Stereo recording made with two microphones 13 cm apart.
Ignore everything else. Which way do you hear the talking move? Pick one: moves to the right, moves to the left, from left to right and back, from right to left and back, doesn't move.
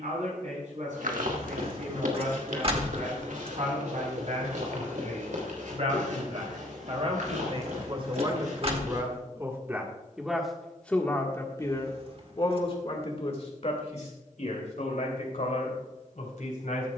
moves to the left.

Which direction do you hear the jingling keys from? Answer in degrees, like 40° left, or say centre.
50° right.